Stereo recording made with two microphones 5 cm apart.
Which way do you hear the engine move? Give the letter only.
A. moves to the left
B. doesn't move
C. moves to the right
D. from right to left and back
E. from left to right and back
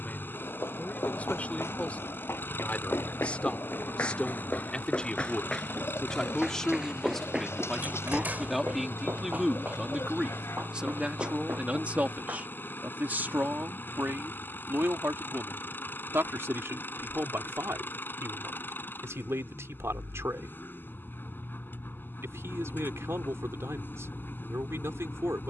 B.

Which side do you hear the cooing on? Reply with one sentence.
You can hear the cooing on the left.